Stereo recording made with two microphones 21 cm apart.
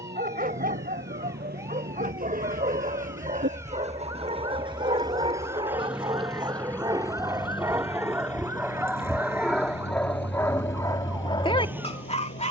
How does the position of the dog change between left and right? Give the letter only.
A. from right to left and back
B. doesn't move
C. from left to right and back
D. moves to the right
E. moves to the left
E.